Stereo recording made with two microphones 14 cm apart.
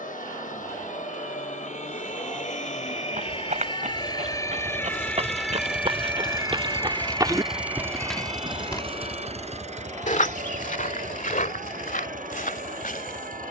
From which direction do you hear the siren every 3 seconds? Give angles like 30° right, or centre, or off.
60° left, 20° left, 40° right, 60° right, 70° right.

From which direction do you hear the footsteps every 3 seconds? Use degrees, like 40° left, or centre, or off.
off, 60° right, 20° right, 70° left, 80° left.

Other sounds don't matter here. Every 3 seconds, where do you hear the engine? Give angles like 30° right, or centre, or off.
70° left, 60° left, centre, 60° right, 70° right.